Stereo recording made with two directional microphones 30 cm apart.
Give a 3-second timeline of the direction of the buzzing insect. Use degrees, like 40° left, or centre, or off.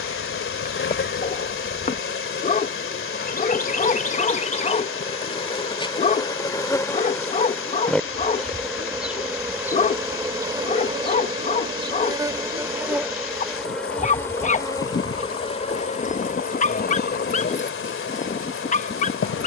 40° left, 20° left, 10° left, 10° right, centre, 30° left, 40° left.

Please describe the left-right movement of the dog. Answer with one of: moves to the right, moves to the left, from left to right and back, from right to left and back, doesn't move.
doesn't move.